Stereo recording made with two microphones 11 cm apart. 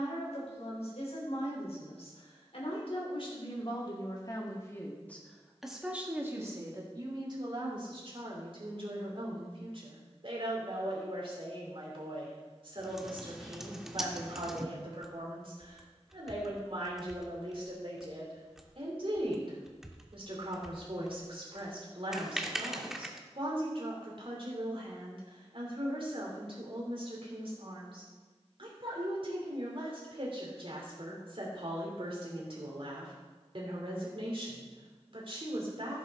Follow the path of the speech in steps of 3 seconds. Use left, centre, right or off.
left, left, right, right, right, right, right, right, right, right, right, right.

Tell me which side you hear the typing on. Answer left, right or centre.
centre.